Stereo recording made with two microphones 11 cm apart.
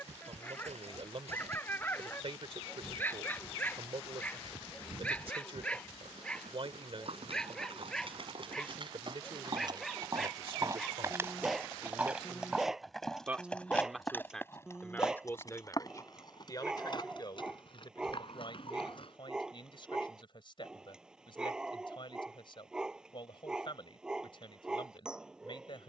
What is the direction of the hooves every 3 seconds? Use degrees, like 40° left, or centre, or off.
70° right, 70° right, 60° right, 30° right, 10° left, 40° left, 50° left, off, off.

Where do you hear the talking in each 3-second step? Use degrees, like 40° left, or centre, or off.
60° right, 60° right, 60° right, 50° right, 10° right, 30° left, 50° left, 50° left, 50° left.